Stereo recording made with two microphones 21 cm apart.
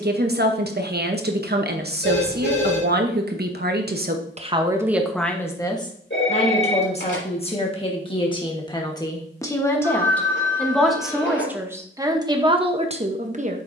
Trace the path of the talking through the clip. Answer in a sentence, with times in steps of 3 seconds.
You can hear the talking on the right from 0 s, on the left from 6 s, in the centre from 9 s and on the right from 12 s.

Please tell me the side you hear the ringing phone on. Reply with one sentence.
In this clip you hear the ringing phone on the left.